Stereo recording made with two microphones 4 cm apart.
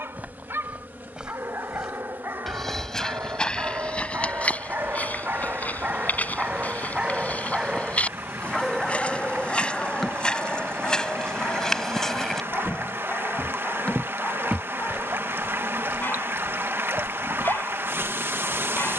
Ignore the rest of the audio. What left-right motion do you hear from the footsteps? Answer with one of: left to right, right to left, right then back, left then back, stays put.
left then back.